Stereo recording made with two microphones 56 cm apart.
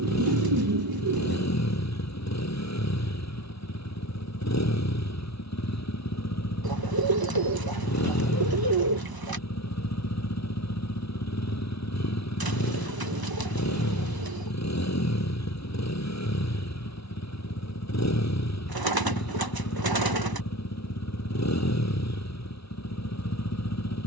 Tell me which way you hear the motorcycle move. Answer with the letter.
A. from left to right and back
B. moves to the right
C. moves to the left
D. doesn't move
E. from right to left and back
D.